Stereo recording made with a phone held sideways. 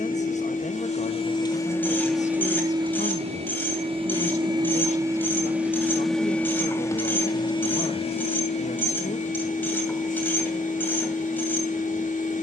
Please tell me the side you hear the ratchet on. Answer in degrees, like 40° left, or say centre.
10° left.